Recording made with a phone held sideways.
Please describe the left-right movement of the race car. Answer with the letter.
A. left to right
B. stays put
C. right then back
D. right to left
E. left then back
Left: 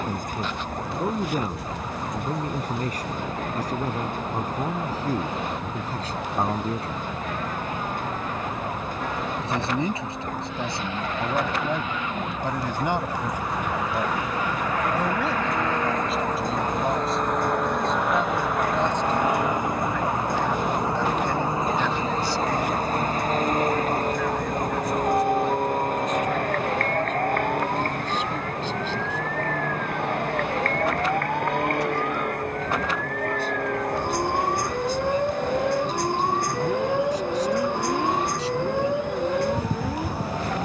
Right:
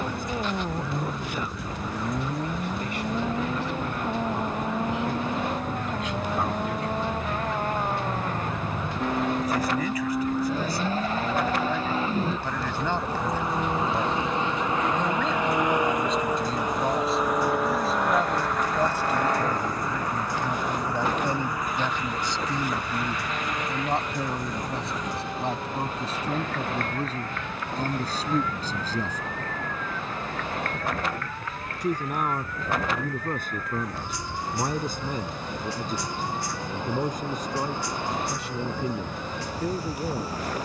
D.